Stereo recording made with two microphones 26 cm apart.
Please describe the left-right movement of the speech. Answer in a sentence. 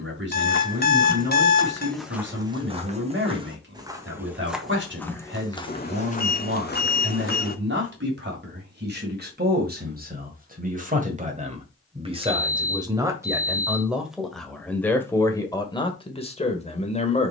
In this clip you hear the speech move from right to left.